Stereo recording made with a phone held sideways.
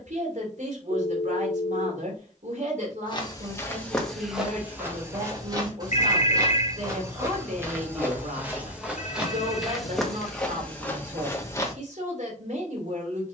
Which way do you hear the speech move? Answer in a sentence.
In this clip you hear the speech stay in one place.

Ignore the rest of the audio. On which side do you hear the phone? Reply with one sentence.
You can hear the phone on the left.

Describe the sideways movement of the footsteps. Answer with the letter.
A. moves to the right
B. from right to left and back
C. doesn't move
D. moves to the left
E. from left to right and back
E.